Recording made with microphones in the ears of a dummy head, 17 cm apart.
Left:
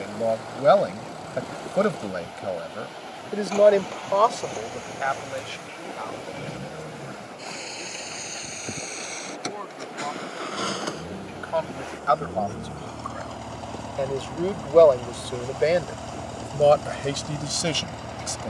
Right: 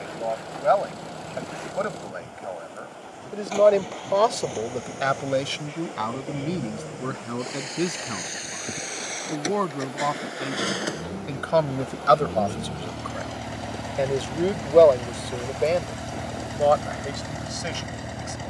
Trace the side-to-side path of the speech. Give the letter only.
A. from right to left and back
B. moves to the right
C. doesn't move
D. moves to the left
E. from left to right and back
E.